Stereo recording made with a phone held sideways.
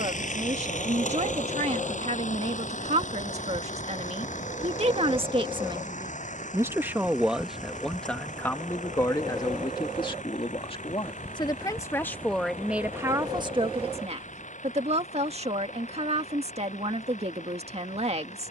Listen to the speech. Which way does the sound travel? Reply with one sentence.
You can hear the speech move from right to left and back again.